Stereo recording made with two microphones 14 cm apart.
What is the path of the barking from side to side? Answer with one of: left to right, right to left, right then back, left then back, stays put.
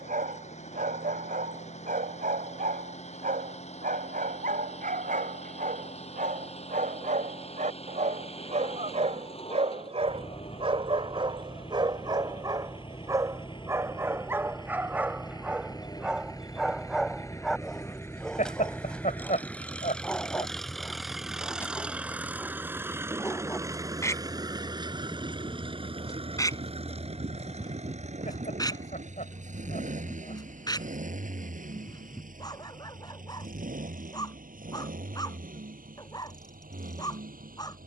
right to left.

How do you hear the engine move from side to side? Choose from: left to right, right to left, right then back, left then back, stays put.
left to right.